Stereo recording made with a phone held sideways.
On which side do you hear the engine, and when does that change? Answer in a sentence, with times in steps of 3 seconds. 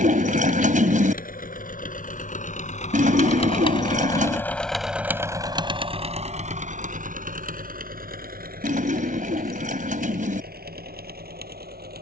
You can hear the engine on the left from 0 s, in the centre from 3 s and on the right from 6 s.